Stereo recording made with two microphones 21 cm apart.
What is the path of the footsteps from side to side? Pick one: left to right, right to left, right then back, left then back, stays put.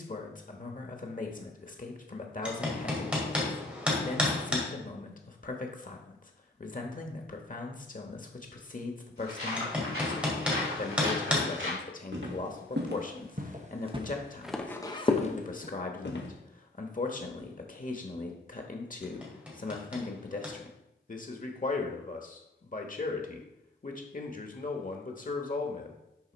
right to left.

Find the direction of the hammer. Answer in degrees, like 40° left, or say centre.
10° right.